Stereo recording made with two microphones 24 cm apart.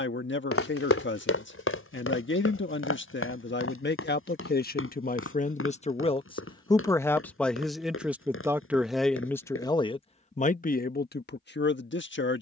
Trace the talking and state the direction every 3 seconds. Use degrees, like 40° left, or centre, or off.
60° left, 40° left, centre, 30° left.